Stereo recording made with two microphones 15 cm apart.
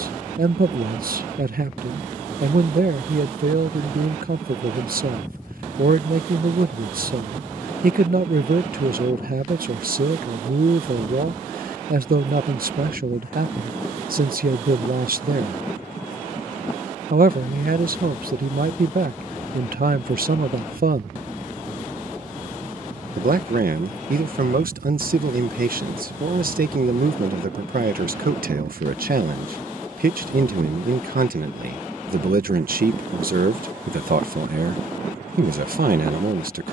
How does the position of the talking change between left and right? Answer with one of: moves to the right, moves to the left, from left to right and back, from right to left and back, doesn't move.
doesn't move.